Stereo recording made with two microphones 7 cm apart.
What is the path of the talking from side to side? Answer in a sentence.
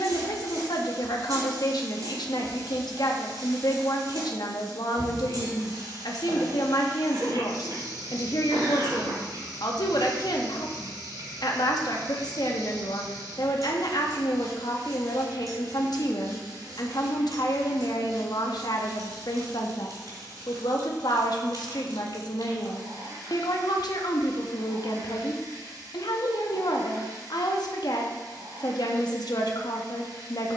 In this clip you hear the talking stay in one place.